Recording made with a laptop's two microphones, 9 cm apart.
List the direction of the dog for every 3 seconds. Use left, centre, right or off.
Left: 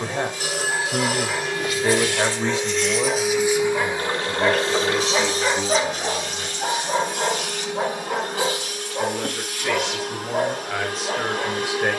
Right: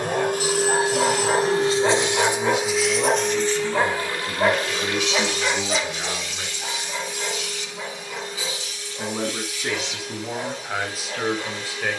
right, centre, left, left.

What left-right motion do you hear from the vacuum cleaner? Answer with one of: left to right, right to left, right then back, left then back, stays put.
right to left.